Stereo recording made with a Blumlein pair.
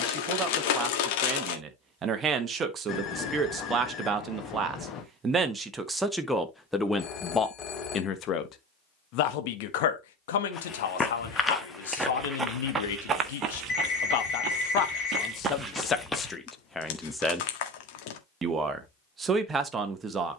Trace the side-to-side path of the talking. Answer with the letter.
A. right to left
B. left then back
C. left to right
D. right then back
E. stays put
B.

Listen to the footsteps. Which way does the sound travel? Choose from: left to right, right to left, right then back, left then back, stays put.
right then back.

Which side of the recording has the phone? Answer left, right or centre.
left.